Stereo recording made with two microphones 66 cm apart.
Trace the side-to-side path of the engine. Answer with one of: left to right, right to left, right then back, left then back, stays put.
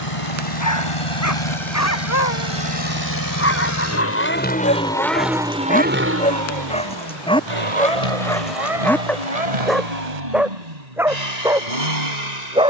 left to right.